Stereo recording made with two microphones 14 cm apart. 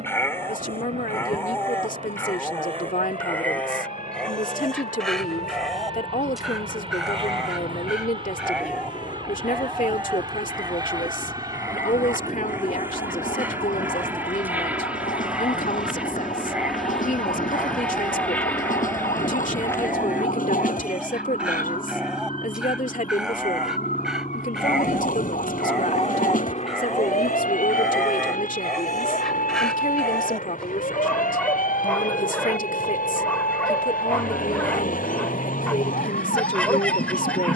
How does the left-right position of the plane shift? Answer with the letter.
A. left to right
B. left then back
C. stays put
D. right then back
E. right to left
E.